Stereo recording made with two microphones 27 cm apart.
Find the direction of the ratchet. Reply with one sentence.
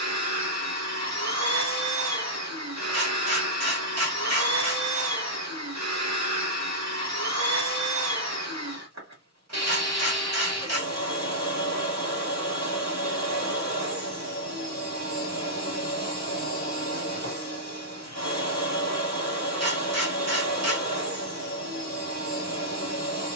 You can hear the ratchet on the right.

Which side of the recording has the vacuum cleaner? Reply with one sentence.
In this clip you hear the vacuum cleaner on the right.